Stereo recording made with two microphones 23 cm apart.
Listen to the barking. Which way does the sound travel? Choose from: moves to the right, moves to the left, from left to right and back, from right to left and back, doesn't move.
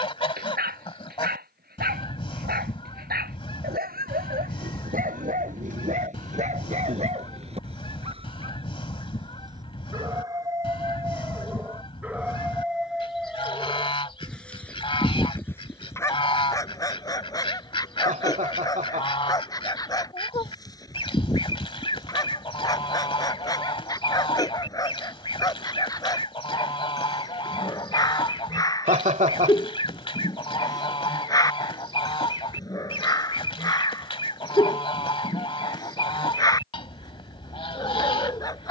moves to the left.